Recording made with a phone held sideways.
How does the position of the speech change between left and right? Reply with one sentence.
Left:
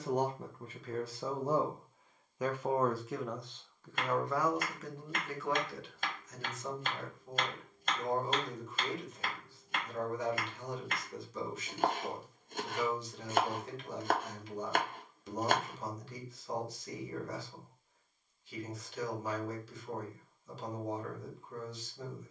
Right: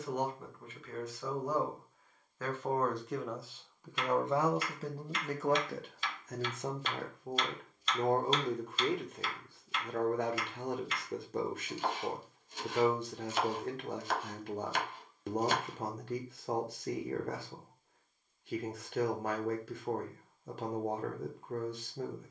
You can hear the speech move to the right.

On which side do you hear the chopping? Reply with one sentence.
You can hear the chopping on the left.